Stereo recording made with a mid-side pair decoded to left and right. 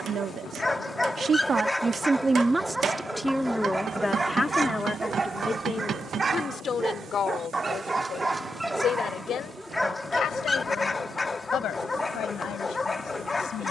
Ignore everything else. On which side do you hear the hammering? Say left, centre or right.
right.